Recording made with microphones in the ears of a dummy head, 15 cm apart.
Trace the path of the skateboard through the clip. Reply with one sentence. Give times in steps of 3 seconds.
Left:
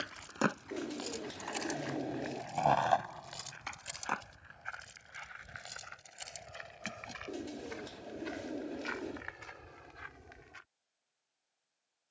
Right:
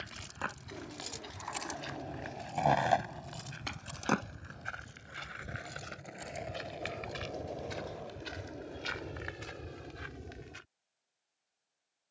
In this clip you hear the skateboard on the left from 0 s, on the right from 3 s and not at all from 9 s.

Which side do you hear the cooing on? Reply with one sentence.
You can hear the cooing on the left.